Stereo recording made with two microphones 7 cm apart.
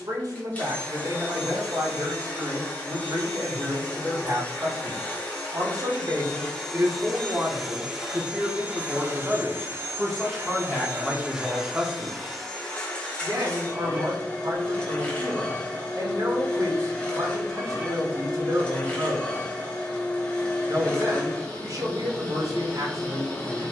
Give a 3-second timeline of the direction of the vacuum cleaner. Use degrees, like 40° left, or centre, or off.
20° left, 20° left, centre, 20° right, 20° left, 20° left, 20° left, 20° left.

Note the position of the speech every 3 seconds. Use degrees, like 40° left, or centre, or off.
60° right, 60° right, 40° right, 10° right, 50° right, 60° right, 60° right, 60° right.